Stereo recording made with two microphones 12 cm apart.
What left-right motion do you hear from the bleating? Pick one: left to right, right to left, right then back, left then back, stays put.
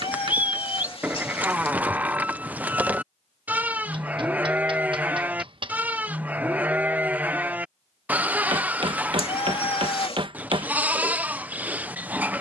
stays put.